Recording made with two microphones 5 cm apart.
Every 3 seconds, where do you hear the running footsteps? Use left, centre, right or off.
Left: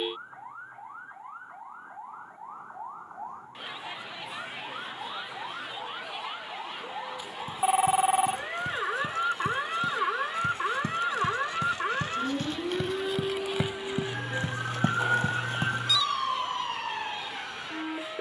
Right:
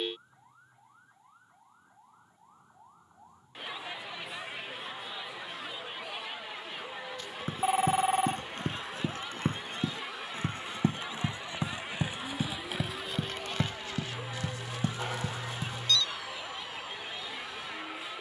off, off, right, right, centre, left.